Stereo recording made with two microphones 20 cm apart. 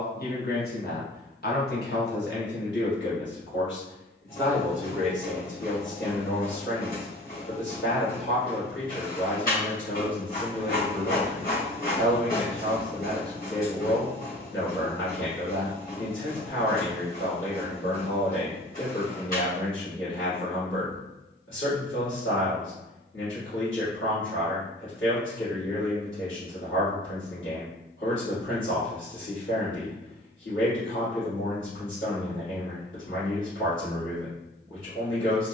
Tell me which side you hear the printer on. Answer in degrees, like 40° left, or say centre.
40° left.